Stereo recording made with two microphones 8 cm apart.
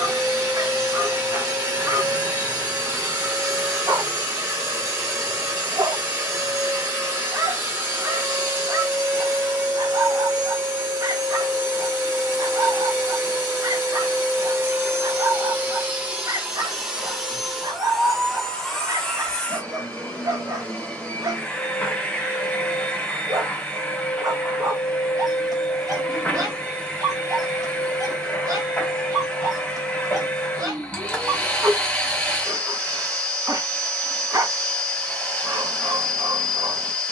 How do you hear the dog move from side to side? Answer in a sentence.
You can hear the dog stay put.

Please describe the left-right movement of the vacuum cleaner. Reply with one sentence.
In this clip you hear the vacuum cleaner move from right to left.